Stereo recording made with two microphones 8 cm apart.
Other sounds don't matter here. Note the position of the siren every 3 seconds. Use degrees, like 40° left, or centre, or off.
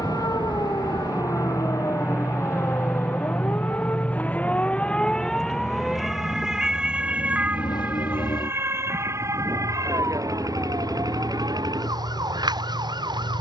40° left, 20° left, 20° right, 40° right, 60° right.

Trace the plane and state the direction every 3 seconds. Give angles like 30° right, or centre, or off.
30° right, 20° left, 50° left, 60° left, 70° left.